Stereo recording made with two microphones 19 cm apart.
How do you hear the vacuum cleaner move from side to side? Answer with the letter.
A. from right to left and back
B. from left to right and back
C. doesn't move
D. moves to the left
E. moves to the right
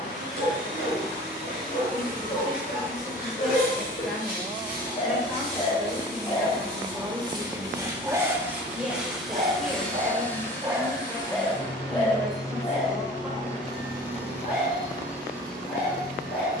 D.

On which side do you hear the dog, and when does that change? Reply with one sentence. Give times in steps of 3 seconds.
In this clip you hear the dog on the left from 0 s, in the centre from 6 s, on the right from 9 s and on the left from 12 s.